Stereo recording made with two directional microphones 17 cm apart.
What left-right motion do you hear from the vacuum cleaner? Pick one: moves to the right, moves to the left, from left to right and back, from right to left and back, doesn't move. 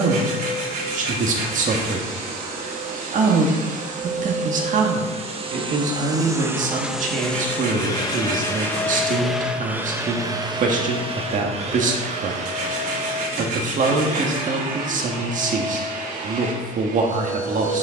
from right to left and back.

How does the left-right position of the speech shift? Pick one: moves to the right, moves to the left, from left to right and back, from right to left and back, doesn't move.
doesn't move.